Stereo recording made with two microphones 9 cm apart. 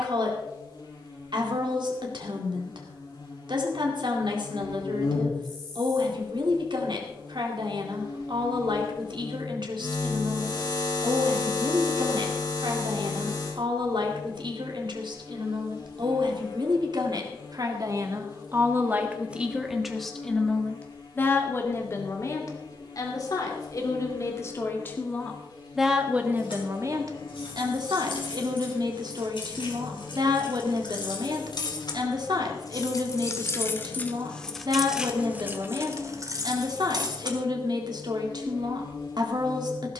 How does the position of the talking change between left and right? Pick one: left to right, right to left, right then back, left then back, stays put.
left then back.